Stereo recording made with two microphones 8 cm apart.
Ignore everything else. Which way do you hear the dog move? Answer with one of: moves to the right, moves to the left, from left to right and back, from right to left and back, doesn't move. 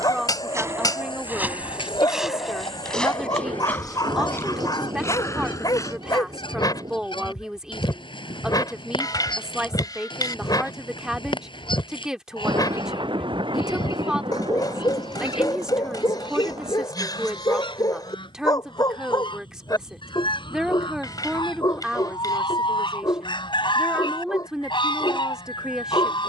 doesn't move.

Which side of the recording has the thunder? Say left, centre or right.
right.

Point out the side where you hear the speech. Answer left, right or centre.
centre.